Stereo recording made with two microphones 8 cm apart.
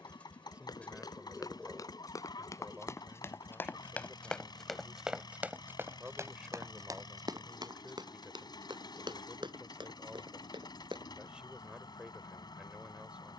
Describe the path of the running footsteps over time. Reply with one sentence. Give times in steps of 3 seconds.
You can hear the running footsteps on the left from 0 s, in the centre from 3 s, on the right from 6 s and not at all from 12 s.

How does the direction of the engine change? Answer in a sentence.
You can hear the engine stay in one place.